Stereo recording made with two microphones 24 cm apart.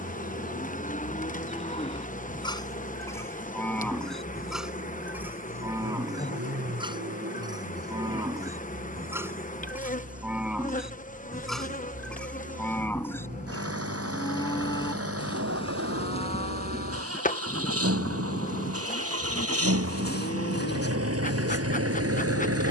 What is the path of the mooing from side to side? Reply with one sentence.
You can hear the mooing move from left to right and back again.